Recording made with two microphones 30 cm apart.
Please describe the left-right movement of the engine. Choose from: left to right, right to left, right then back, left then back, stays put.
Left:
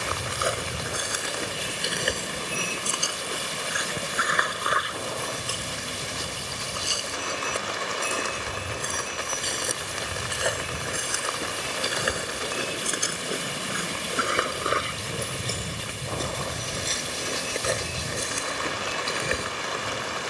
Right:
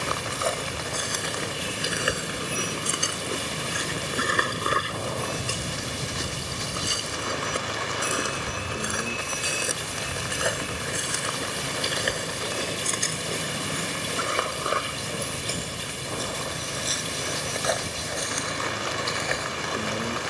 stays put.